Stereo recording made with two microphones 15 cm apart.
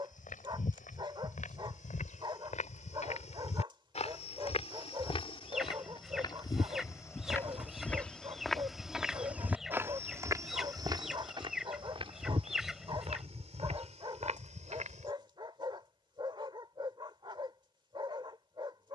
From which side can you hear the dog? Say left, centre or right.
right.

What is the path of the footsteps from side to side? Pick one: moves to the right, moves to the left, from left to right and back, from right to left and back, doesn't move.
moves to the right.